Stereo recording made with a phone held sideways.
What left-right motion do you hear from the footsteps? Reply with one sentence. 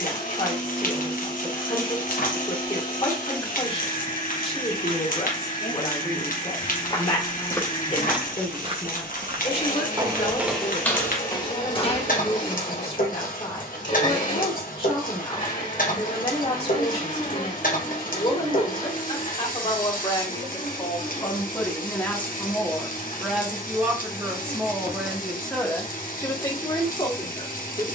You can hear the footsteps go right and come back.